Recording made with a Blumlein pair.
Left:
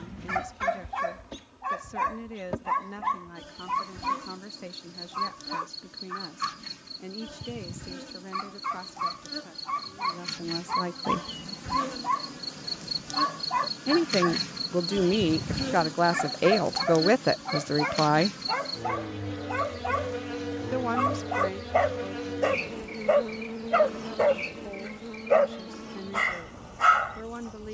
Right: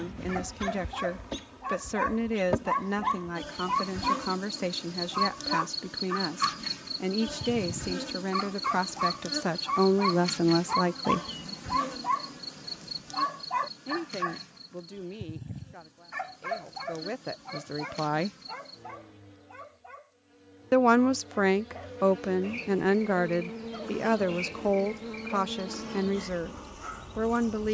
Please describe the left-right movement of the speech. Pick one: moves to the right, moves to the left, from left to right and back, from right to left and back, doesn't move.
from right to left and back.